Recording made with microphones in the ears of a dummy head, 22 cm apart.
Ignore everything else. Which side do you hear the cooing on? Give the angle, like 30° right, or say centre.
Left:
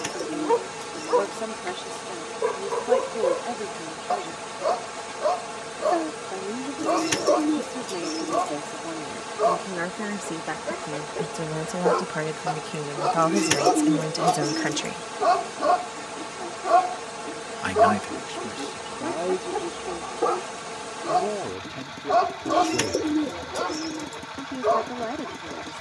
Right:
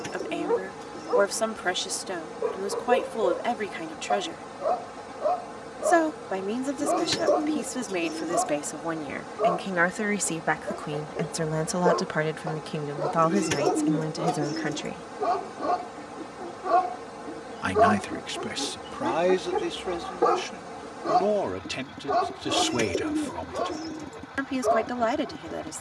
40° left.